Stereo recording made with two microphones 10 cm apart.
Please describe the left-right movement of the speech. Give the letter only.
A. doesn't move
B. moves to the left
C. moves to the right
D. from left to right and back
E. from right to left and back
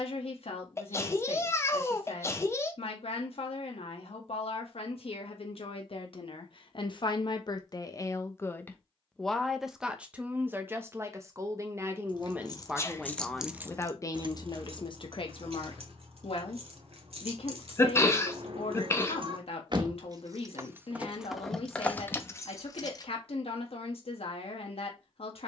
D.